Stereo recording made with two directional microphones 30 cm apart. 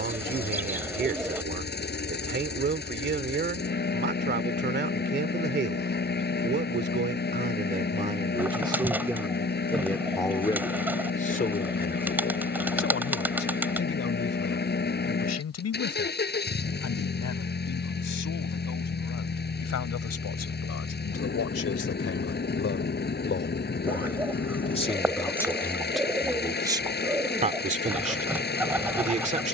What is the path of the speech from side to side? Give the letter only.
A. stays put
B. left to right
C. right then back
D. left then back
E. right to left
D.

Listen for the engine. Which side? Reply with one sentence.
You can hear the engine on the left.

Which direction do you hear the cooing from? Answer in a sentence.
In this clip you hear the cooing in the centre.